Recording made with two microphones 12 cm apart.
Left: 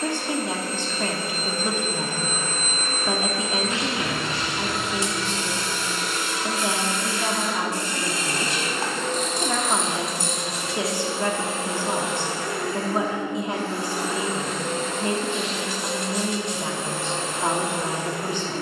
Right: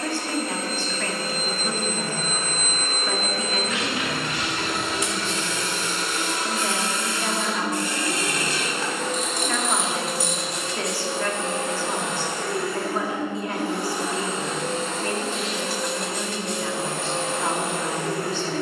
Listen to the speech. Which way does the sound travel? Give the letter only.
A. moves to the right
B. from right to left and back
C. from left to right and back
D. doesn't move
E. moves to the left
D.